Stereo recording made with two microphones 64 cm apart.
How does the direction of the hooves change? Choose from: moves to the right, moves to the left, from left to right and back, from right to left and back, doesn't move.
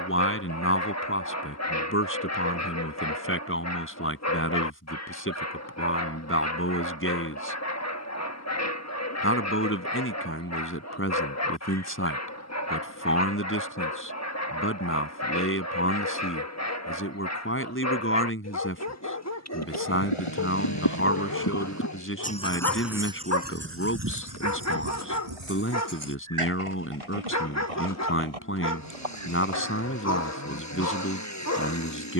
moves to the right.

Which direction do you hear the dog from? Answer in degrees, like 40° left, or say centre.
20° left.